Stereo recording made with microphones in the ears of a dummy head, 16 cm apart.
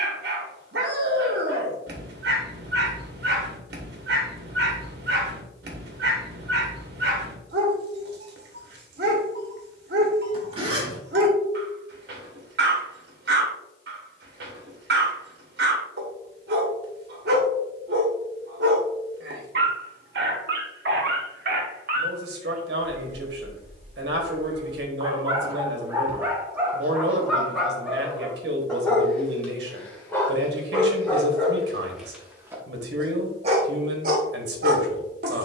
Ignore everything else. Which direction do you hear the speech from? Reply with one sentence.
You can hear the speech on the right.